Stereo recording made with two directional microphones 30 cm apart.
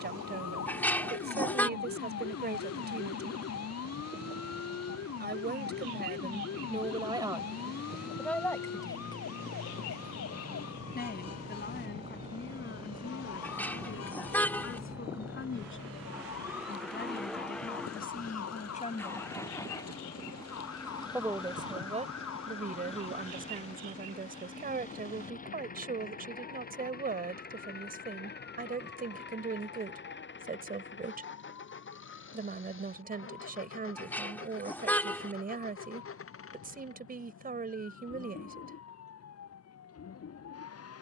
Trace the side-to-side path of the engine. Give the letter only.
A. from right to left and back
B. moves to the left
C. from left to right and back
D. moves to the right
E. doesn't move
B.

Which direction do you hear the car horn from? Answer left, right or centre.
centre.